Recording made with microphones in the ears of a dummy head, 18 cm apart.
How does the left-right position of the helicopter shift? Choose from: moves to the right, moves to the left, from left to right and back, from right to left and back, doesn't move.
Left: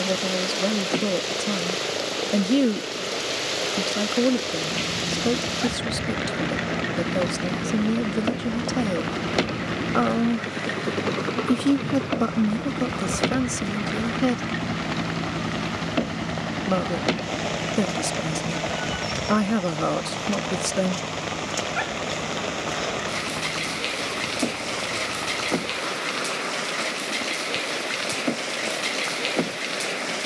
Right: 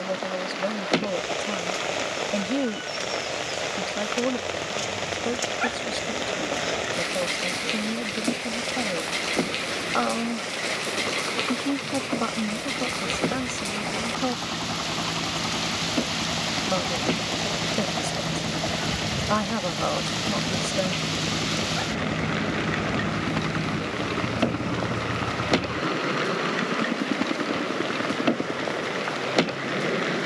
moves to the right.